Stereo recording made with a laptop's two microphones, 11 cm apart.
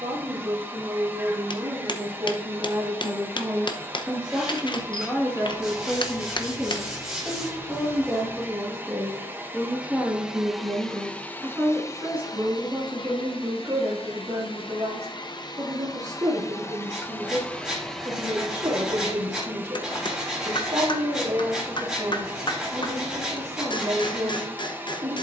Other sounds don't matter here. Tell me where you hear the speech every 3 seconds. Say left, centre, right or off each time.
right, centre, centre, centre, right, right, right, right, right.